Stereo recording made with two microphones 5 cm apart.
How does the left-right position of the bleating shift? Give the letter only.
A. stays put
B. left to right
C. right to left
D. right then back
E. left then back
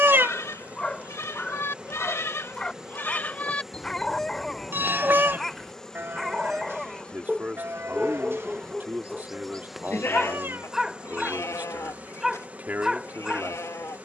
D.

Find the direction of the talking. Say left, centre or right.
right.